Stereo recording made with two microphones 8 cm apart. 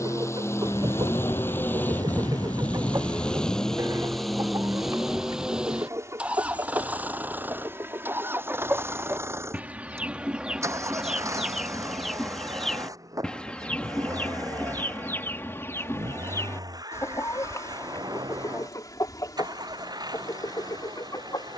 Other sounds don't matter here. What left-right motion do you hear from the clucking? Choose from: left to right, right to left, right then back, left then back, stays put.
right to left.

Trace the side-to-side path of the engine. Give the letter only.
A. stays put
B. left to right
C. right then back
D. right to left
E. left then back
B.